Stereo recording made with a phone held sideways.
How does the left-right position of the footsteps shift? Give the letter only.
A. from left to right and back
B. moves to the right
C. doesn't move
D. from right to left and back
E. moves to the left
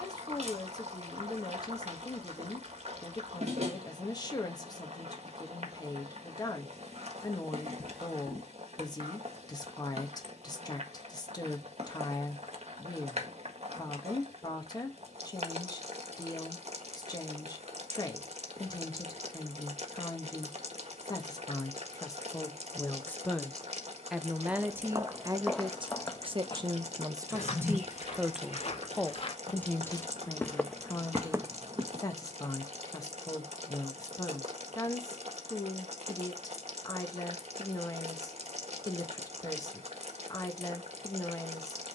D.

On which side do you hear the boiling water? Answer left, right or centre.
right.